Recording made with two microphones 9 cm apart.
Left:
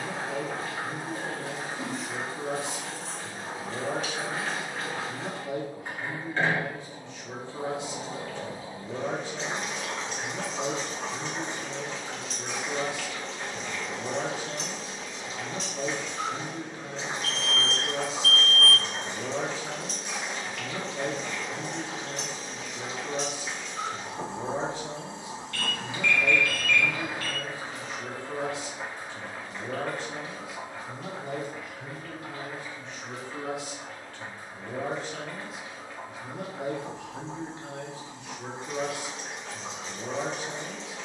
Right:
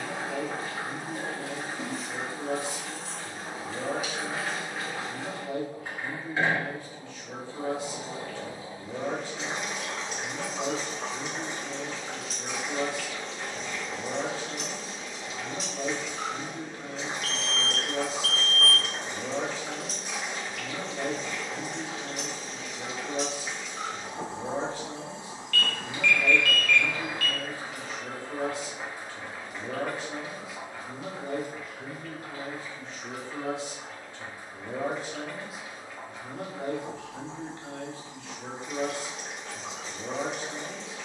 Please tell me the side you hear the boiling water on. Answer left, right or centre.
centre.